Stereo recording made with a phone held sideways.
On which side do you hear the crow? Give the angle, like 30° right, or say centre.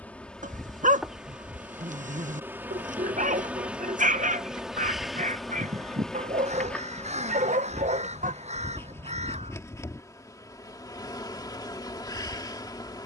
50° right.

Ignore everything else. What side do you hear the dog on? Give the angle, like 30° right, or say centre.
60° right.